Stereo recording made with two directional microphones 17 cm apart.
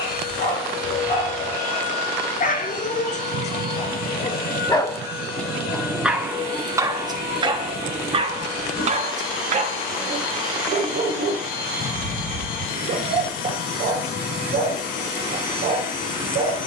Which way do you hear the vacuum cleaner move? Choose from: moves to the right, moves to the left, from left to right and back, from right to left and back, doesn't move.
doesn't move.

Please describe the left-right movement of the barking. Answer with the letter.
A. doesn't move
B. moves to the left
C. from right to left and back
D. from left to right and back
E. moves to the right
E.